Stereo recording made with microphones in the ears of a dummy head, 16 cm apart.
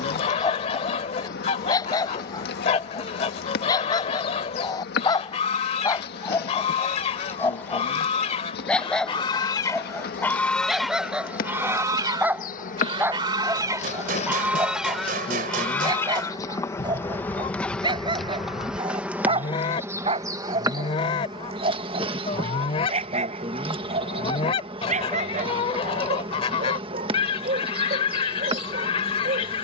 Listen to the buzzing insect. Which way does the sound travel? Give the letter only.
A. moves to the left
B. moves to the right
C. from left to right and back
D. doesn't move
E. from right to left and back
B.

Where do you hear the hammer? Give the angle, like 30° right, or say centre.
50° right.